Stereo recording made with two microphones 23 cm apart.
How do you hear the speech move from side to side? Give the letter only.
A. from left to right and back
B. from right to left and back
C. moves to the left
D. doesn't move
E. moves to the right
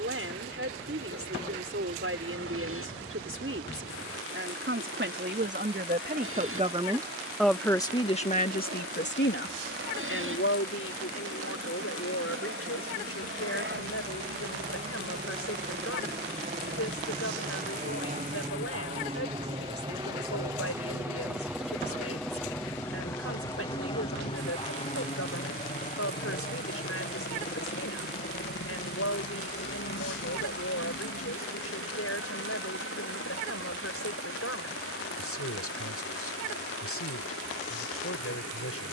C.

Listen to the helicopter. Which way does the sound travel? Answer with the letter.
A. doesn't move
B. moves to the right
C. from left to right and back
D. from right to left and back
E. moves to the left
E.